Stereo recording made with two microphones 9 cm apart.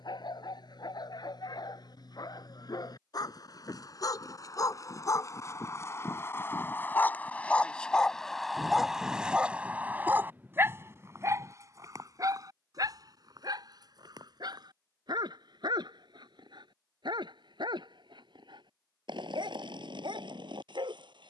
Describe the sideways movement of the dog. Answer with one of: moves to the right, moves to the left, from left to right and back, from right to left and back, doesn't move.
moves to the right.